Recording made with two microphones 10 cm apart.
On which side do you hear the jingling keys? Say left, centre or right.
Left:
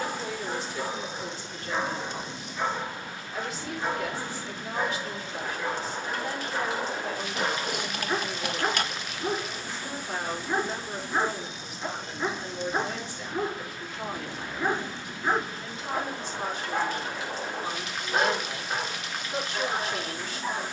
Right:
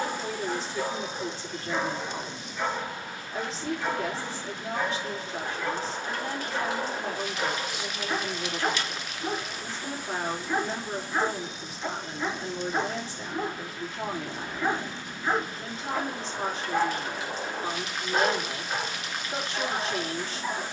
left.